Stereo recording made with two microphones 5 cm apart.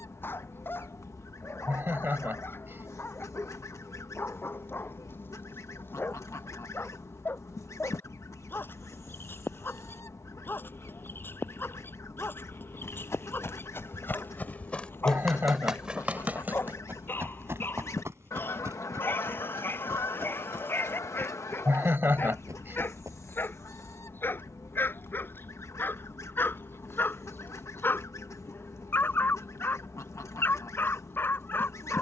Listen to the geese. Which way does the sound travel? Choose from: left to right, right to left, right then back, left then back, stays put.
stays put.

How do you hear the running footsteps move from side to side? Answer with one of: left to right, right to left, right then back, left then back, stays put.
left to right.